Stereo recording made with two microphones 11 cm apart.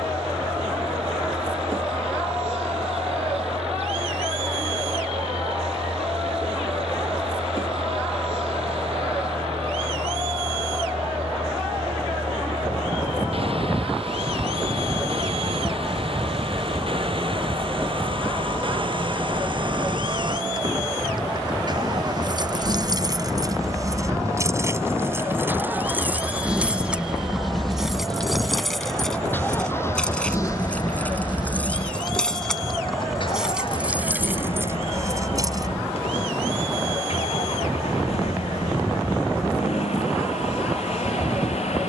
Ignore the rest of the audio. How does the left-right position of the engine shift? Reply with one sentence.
In this clip you hear the engine go from the right side to the left.